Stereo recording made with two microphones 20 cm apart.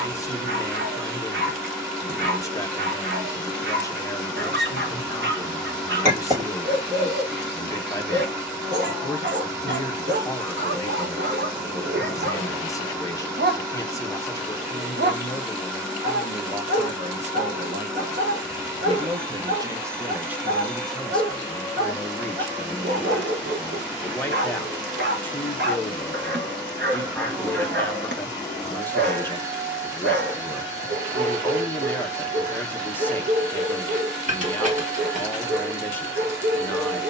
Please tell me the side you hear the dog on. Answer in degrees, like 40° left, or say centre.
60° right.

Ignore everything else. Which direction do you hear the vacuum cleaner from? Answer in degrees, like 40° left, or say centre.
10° right.